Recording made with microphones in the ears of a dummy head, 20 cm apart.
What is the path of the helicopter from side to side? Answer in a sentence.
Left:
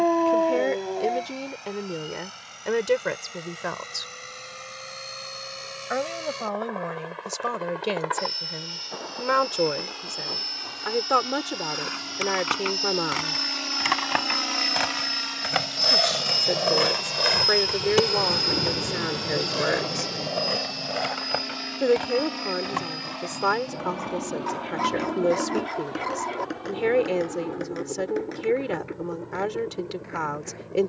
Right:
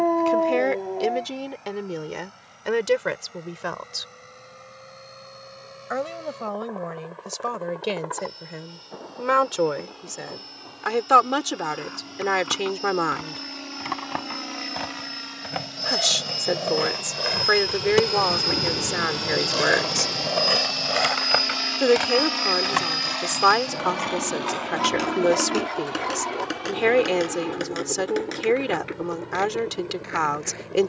In this clip you hear the helicopter travel towards the right.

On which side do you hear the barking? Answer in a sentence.
You can hear the barking in the centre.